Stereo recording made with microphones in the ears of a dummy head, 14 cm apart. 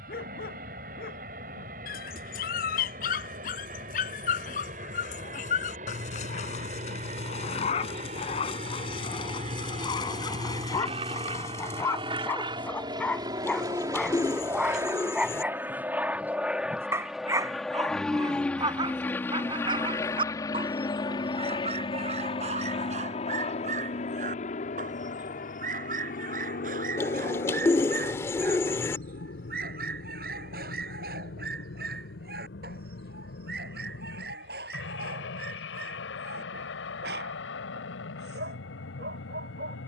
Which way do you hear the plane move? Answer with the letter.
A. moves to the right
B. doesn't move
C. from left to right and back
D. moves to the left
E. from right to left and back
D.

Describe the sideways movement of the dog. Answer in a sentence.
You can hear the dog travel towards the right.